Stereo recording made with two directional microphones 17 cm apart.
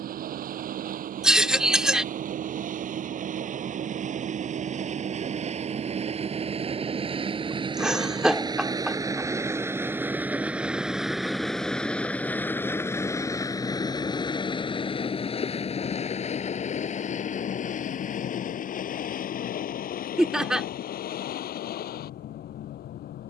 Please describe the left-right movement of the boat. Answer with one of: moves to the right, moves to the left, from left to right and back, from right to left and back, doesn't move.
moves to the left.